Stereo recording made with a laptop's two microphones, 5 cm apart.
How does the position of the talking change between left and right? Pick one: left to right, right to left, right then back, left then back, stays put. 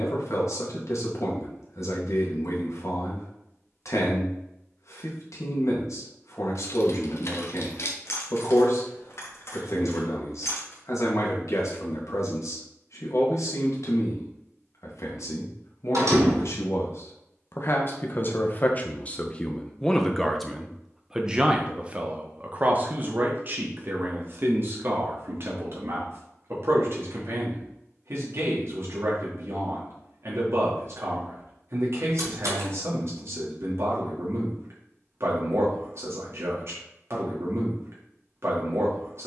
left to right.